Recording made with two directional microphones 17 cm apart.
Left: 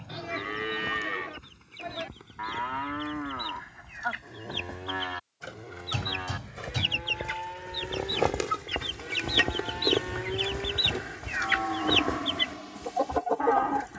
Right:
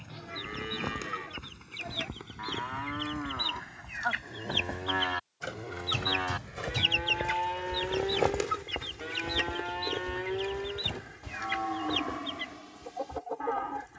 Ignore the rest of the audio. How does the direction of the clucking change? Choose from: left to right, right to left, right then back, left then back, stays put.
right to left.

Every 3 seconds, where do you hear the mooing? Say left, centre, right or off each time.
left, centre, right, centre, left.